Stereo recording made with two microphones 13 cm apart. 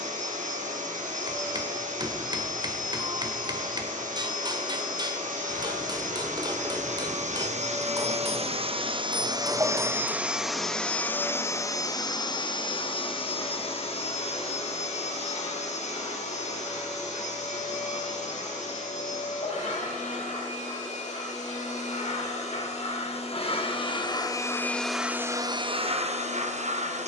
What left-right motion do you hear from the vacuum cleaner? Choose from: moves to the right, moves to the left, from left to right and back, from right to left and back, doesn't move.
from right to left and back.